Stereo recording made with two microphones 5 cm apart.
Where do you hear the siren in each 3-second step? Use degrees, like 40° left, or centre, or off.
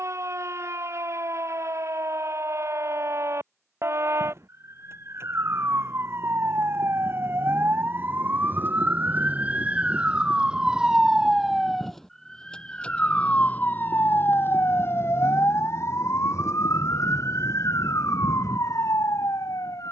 60° right, 60° right, 40° right, 20° right, 30° left, 60° left, 70° left.